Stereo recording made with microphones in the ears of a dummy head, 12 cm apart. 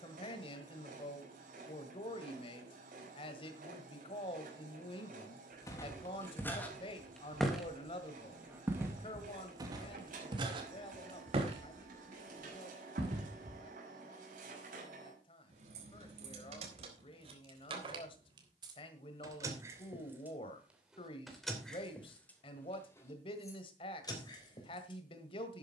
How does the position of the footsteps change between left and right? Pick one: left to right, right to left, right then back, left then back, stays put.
left to right.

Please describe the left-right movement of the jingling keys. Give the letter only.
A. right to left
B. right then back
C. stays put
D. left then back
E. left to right
A.